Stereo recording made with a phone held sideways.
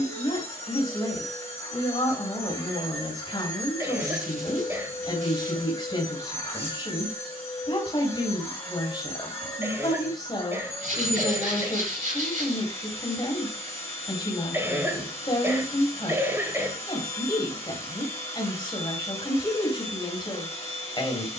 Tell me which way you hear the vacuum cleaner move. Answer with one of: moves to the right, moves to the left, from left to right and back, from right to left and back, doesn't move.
doesn't move.